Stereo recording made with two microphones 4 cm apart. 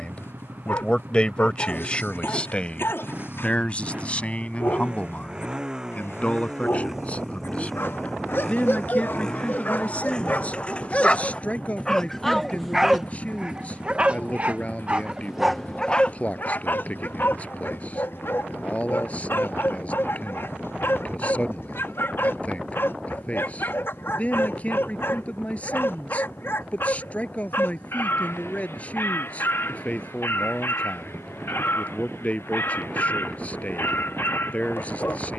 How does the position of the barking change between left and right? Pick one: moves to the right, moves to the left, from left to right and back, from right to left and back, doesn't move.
from left to right and back.